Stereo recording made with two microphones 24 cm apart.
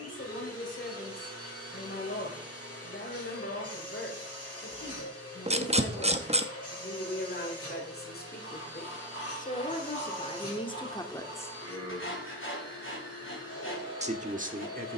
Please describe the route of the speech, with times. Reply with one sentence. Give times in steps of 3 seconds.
In this clip you hear the speech on the left from 0 s and on the right from 12 s.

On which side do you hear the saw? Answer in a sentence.
In this clip you hear the saw on the left.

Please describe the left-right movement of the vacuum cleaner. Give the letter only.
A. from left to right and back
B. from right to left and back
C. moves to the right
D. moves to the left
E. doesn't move
E.